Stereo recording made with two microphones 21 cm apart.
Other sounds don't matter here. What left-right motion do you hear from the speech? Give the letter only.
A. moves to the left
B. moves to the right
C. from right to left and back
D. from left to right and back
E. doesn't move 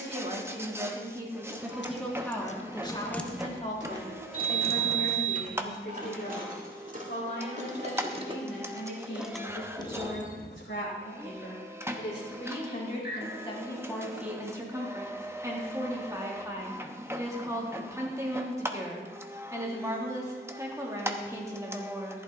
C.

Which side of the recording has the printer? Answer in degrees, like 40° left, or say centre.
10° right.